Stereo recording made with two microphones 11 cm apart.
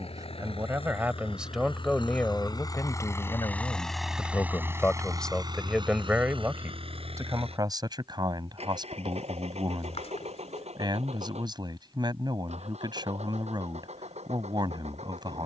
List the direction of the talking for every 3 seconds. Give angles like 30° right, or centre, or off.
centre, 20° left, 30° right, 40° right, 40° right.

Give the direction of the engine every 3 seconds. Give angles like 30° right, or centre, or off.
50° left, 10° right, 60° right, 70° right, 80° right.